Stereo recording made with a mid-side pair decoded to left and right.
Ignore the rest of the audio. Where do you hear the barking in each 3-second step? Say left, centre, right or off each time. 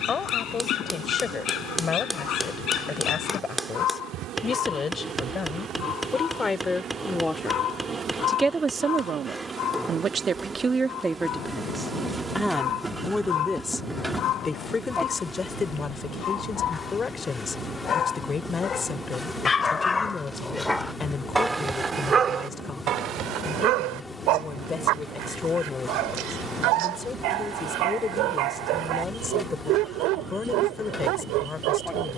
left, left, left, left, left, left, left, right, right, right, right.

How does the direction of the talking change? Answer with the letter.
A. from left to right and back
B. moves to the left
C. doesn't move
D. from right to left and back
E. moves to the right
A.